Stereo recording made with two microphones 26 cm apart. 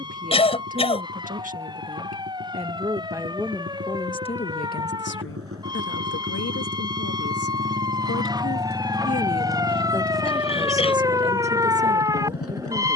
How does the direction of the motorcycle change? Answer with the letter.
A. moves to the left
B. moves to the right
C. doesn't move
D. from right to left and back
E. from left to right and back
A.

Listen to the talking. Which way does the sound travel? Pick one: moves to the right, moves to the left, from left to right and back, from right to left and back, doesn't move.
from right to left and back.